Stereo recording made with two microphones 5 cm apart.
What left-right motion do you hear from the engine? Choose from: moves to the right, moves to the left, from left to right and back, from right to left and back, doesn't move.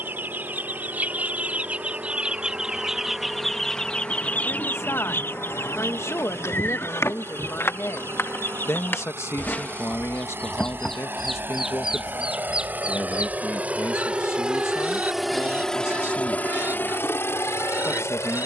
moves to the left.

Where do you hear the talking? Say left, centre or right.
left.